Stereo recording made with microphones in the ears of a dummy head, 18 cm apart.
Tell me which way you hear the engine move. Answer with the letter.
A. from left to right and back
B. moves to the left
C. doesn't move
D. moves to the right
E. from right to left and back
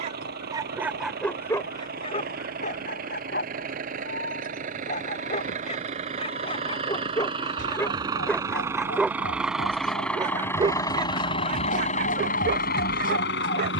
B.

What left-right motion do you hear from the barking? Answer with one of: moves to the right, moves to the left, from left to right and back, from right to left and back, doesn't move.
from right to left and back.